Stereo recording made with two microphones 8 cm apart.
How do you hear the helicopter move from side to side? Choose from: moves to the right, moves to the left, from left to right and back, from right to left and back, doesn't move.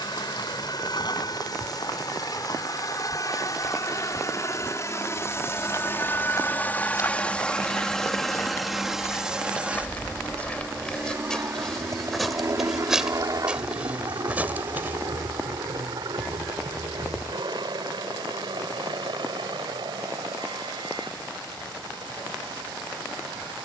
moves to the right.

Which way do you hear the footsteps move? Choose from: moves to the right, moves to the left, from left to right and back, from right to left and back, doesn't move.
moves to the right.